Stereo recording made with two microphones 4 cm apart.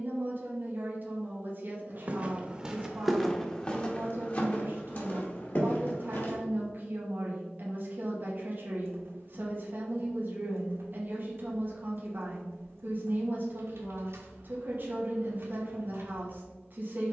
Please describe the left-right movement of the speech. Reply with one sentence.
You can hear the speech stay in one place.